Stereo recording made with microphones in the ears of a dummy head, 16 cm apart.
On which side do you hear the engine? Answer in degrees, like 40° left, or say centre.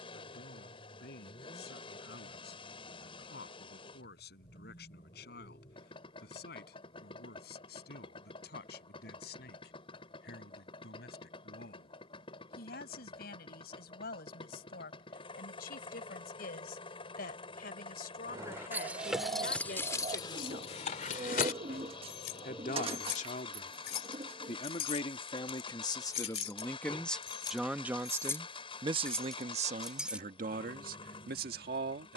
30° left.